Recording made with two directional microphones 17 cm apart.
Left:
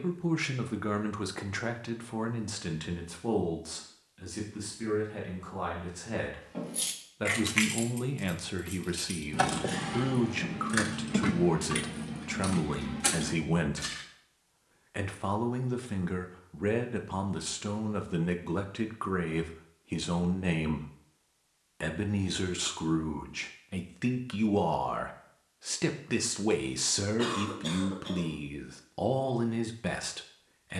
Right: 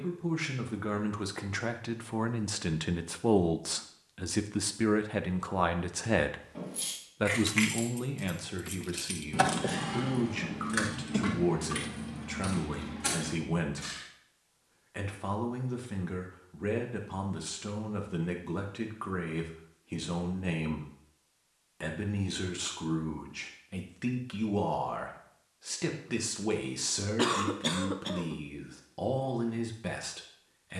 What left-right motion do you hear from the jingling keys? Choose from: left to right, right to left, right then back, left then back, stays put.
right then back.